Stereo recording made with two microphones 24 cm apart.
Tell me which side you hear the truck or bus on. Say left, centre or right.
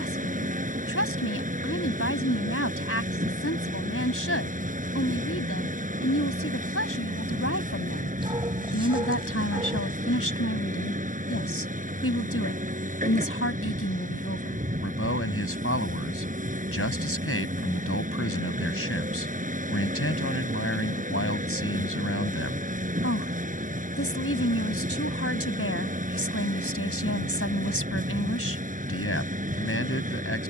right.